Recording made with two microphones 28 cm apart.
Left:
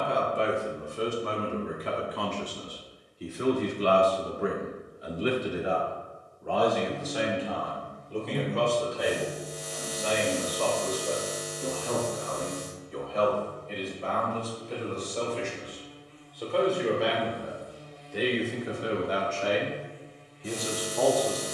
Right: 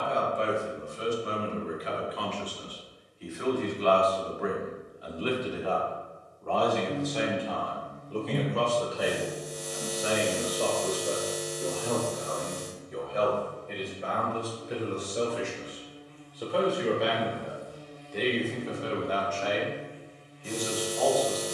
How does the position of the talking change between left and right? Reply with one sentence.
In this clip you hear the talking move from left to right and back again.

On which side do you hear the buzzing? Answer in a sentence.
In this clip you hear the buzzing on the right.